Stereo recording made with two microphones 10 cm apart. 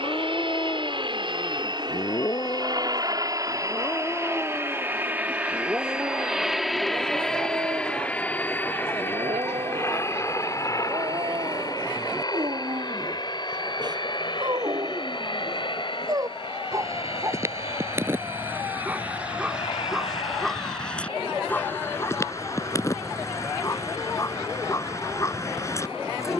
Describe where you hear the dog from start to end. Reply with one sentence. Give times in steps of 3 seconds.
In this clip you hear the dog on the left from 0 s, in the centre from 3 s, on the right from 6 s, in the centre from 18 s and on the left from 21 s.